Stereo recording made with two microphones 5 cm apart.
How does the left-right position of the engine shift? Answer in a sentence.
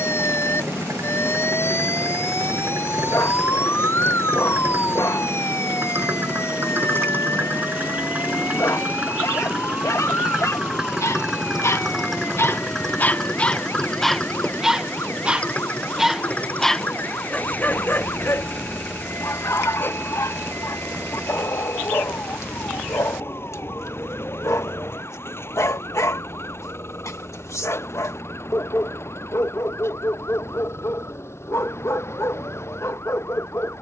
You can hear the engine travel towards the left.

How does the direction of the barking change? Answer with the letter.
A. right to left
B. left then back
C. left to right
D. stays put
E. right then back
E.